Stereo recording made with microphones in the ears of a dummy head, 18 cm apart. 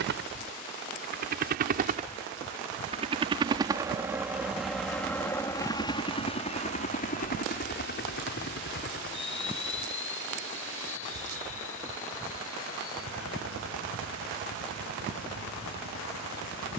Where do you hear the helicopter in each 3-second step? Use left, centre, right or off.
right, centre, left, left, left, left.